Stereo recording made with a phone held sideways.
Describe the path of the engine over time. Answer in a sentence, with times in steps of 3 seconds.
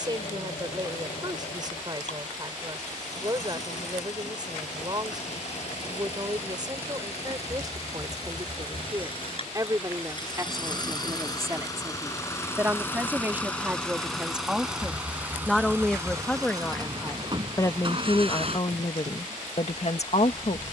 You can hear the engine on the left from 0 s, in the centre from 12 s and on the right from 15 s.